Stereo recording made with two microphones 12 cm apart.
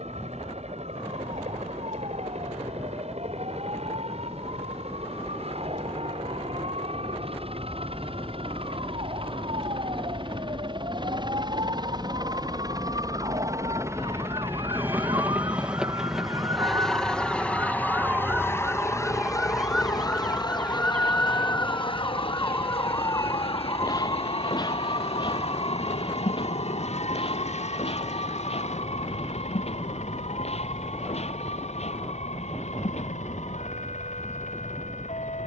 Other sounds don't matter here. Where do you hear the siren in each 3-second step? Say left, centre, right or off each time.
right, right, right, right, right, right, centre, left, left, left, left, left.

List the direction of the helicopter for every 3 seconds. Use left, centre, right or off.
right, right, right, right, right, centre, left, left, left, left, left, left.